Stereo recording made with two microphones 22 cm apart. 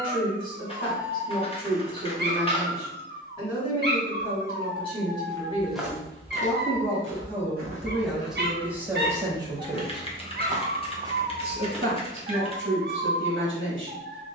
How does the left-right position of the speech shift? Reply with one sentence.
In this clip you hear the speech go from the left side to the right.